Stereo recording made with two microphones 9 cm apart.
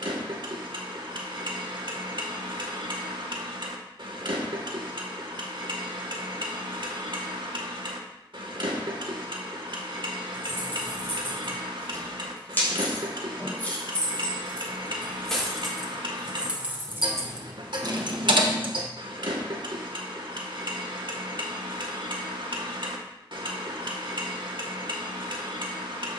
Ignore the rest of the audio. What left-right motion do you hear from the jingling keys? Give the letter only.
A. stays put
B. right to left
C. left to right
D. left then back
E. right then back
C.